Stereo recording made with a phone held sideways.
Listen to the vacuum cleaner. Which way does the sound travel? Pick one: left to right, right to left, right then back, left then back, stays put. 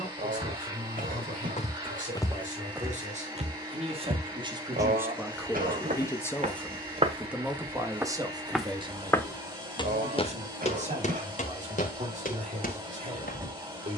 stays put.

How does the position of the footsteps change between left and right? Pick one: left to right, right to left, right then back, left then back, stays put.
right then back.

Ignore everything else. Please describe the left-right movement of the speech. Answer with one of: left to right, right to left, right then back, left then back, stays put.
left then back.